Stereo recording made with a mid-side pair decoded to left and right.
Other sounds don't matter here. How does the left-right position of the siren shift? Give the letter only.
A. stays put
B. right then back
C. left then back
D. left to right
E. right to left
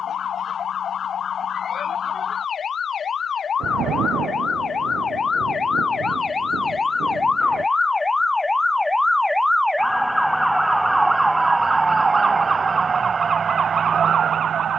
D.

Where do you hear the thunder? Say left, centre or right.
right.